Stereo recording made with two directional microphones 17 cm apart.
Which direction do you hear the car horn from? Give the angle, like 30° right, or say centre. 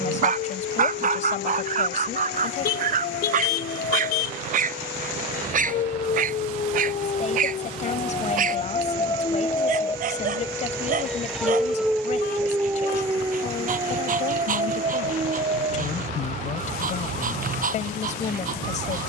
70° left.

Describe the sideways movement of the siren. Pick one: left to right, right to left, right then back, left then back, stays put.
left to right.